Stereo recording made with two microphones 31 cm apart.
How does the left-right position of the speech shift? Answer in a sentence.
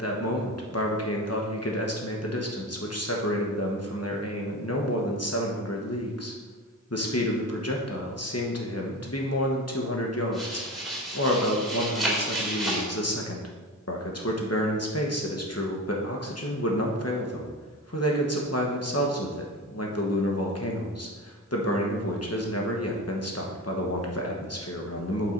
In this clip you hear the speech stay put.